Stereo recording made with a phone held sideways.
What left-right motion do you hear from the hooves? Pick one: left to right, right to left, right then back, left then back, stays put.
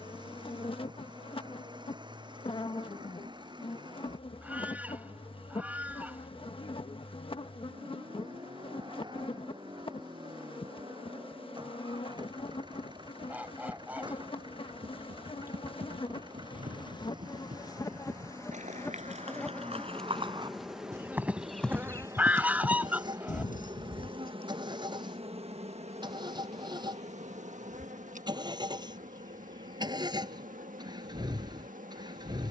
right to left.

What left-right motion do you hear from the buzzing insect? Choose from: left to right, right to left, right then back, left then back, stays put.
left to right.